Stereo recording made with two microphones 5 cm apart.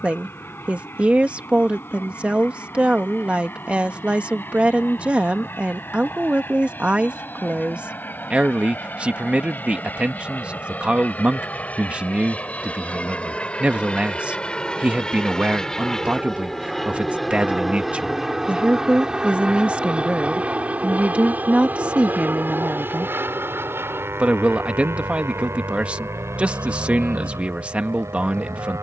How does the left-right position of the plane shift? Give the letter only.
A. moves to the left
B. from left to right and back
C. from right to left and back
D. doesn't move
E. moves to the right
E.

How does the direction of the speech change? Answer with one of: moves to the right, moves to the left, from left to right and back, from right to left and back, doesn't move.
doesn't move.